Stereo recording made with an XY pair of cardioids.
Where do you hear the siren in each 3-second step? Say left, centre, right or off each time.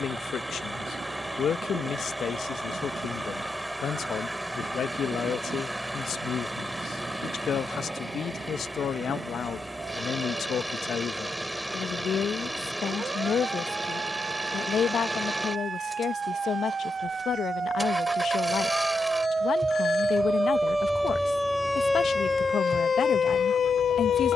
right, right, right, right, right, right, right, left.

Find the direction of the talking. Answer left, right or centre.
left.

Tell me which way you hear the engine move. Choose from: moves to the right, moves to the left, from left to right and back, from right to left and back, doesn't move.
doesn't move.